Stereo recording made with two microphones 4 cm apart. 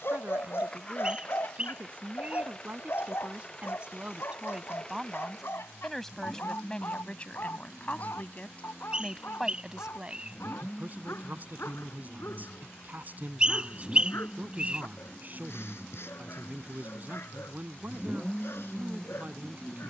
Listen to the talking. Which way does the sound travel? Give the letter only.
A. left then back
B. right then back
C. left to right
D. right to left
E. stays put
A.